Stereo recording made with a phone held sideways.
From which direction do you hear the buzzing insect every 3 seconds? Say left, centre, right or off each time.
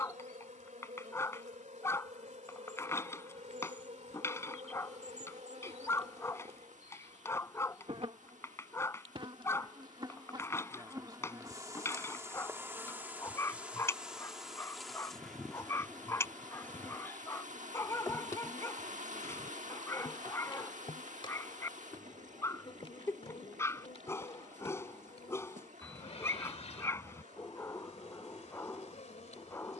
right, right, right, right, centre, centre, left, left, left, left.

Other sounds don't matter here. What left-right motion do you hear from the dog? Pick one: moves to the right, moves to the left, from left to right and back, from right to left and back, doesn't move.
doesn't move.